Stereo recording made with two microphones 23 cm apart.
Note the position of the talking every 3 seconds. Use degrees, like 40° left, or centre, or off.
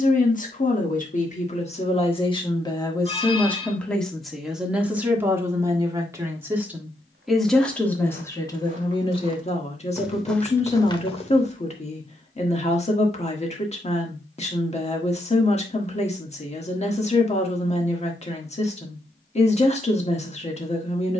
30° left, centre, centre, 30° left, 30° left, 30° left, 30° left.